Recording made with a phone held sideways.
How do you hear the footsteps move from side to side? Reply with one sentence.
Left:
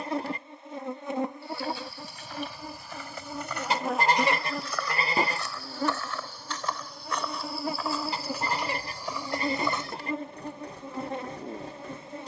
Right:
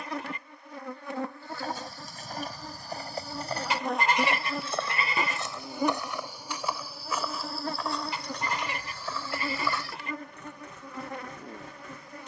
You can hear the footsteps go from the right side to the left.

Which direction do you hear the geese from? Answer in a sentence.
In this clip you hear the geese on the left.